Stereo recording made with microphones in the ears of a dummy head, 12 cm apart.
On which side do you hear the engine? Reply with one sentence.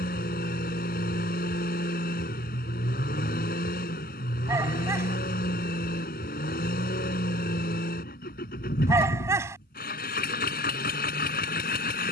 In this clip you hear the engine on the left.